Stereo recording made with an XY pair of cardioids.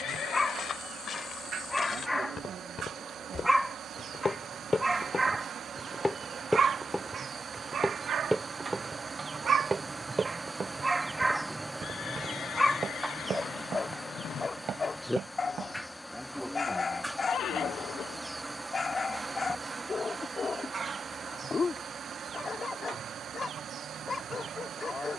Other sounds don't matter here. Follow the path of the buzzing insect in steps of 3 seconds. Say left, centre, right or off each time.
right, right, right, right, centre, centre, right, right, right.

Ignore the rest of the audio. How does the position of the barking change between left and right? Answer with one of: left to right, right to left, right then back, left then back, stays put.
right then back.